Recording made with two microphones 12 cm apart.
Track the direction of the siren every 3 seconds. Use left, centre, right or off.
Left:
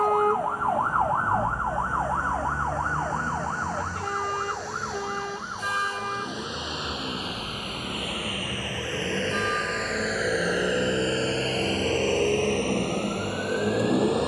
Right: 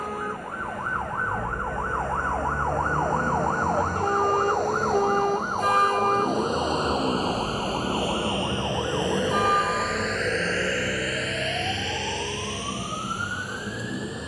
left, right, right, right, right.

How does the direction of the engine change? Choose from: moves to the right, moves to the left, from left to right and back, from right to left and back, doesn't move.
moves to the left.